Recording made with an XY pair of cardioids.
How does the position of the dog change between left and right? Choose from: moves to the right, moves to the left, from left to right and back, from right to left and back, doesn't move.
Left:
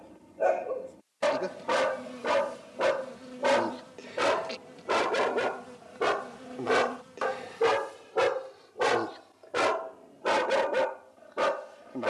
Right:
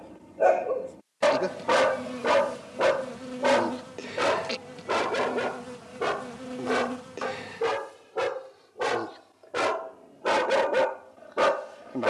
from right to left and back.